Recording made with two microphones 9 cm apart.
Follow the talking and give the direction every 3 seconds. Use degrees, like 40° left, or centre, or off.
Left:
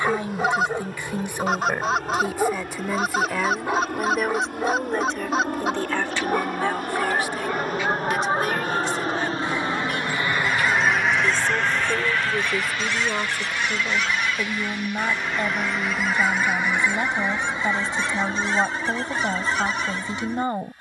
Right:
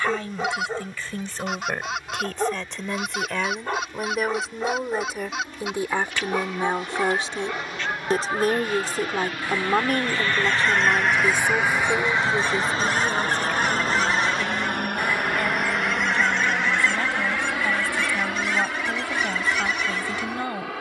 10° left, centre, 30° right, 30° right, 10° left, 20° left, 20° left.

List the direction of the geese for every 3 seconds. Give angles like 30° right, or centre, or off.
40° left, 40° left, 40° left, 10° left, 30° right, 10° left, 30° left.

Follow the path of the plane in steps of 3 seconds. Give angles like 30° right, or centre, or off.
70° left, 70° left, 50° left, 10° left, 30° right, 60° right, 70° right.